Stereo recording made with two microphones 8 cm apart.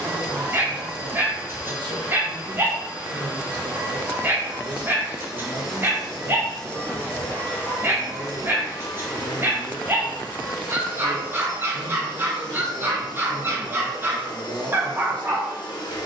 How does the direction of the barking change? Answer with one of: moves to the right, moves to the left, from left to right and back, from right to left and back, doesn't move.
doesn't move.